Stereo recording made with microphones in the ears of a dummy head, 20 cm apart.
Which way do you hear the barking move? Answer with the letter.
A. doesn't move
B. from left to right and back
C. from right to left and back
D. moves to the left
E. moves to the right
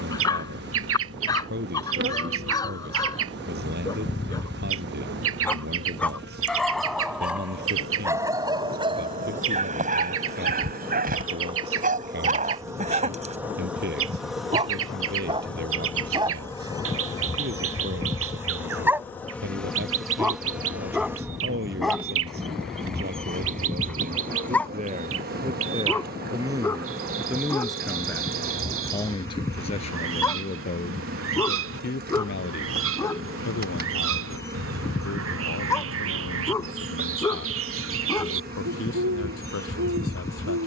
B.